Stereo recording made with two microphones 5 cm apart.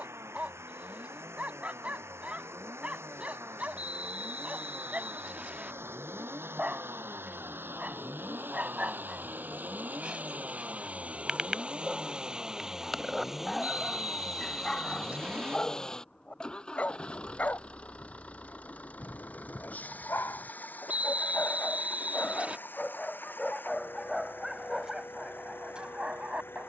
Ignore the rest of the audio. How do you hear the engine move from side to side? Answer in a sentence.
You can hear the engine move from right to left.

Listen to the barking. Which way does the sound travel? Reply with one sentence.
You can hear the barking move from right to left and back again.